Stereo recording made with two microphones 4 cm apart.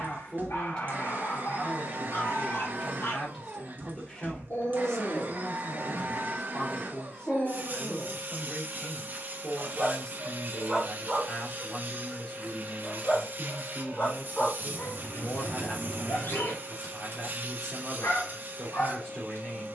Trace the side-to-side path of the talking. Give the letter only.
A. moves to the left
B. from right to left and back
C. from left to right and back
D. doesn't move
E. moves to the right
D.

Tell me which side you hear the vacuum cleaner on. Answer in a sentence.
In this clip you hear the vacuum cleaner on the right.